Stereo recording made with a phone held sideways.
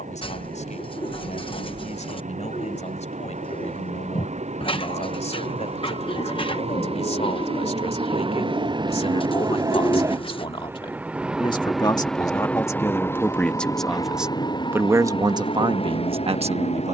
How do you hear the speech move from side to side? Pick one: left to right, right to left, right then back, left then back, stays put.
left to right.